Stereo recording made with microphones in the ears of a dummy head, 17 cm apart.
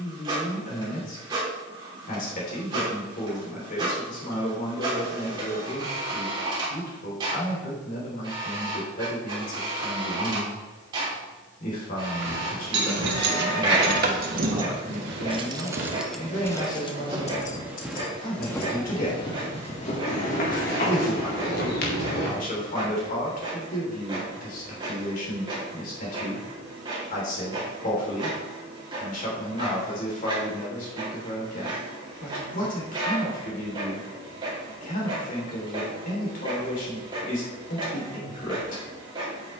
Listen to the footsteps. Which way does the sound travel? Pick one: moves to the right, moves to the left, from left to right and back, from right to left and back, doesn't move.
moves to the left.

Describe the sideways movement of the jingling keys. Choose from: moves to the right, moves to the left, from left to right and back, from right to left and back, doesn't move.
moves to the left.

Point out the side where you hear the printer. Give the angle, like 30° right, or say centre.
20° right.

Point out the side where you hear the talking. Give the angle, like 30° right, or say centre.
50° left.